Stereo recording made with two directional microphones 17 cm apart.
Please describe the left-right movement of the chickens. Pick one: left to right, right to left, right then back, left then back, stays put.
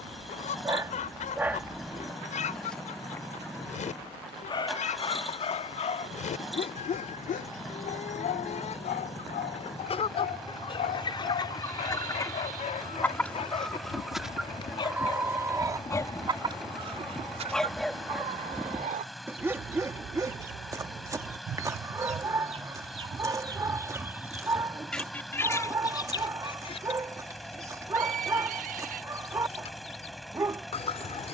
right then back.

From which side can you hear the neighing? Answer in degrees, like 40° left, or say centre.
60° right.